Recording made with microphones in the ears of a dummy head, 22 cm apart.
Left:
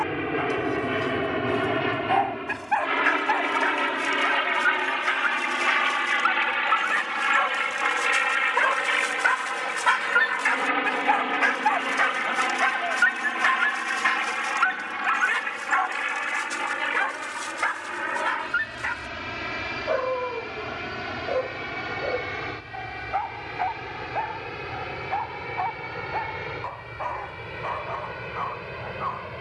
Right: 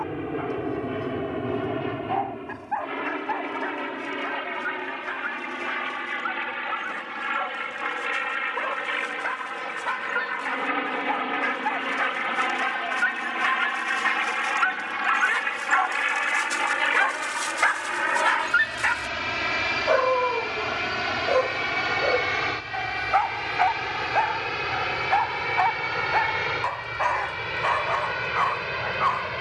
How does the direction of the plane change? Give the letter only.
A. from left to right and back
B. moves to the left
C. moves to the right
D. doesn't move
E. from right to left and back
C.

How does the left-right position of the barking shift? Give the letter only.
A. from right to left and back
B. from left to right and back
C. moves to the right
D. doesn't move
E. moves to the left
C.